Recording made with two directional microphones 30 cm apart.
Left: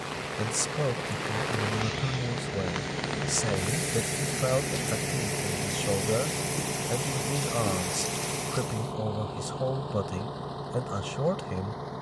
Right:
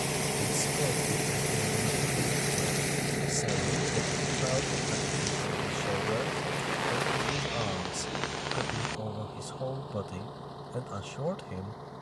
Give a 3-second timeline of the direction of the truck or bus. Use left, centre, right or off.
right, centre, left, left.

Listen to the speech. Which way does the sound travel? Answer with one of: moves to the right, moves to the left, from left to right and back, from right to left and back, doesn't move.
doesn't move.